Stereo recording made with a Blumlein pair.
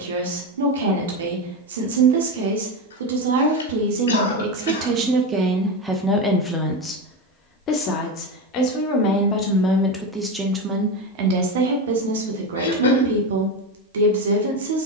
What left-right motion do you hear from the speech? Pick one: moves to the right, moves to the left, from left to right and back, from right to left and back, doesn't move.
from right to left and back.